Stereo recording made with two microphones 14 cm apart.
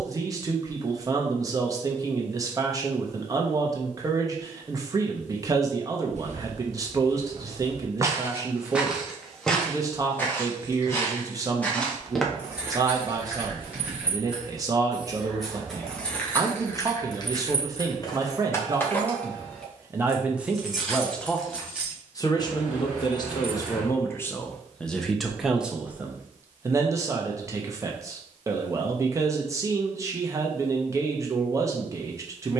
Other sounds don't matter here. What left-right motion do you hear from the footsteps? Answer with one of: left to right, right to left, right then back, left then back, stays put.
left then back.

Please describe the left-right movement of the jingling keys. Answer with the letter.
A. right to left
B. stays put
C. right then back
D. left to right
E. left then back
E.